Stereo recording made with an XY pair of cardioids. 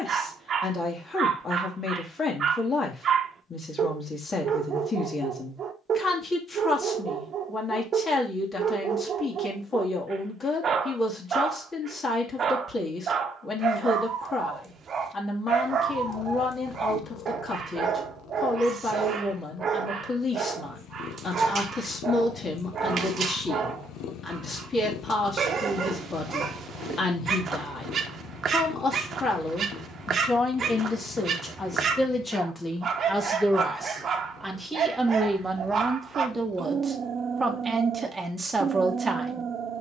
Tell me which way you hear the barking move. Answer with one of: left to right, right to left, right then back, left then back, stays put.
stays put.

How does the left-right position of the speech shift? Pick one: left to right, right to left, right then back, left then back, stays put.
left to right.